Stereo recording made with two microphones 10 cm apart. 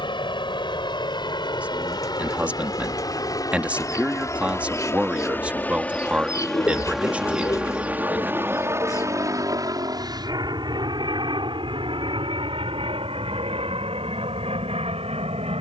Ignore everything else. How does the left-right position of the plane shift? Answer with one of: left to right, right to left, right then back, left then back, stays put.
left to right.